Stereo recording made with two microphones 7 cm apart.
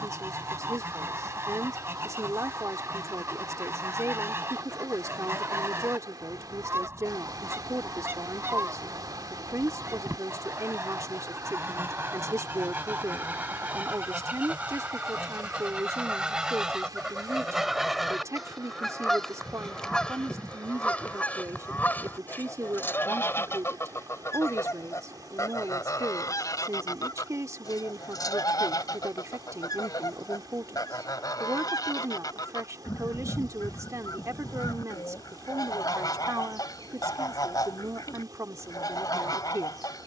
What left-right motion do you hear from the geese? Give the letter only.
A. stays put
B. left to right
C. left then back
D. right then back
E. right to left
E.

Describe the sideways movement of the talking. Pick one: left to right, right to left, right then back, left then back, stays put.
stays put.